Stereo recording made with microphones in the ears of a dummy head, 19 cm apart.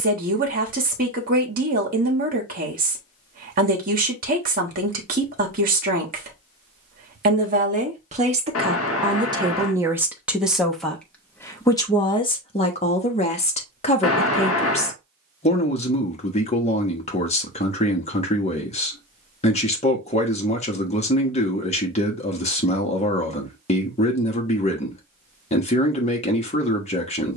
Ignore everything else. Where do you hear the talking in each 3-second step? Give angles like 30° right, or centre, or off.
40° right, 40° right, 40° right, centre, 30° left, 30° left, 30° left, 30° left, 30° left.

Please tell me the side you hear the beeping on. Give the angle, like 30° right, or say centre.
70° left.